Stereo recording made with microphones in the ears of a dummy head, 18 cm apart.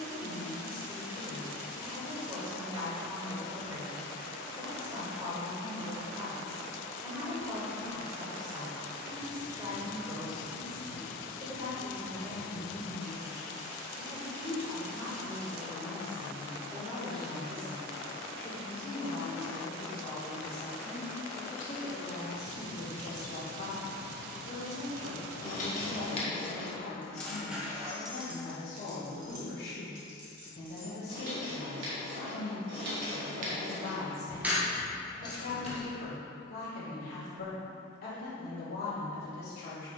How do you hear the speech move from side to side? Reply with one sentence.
You can hear the speech move from right to left.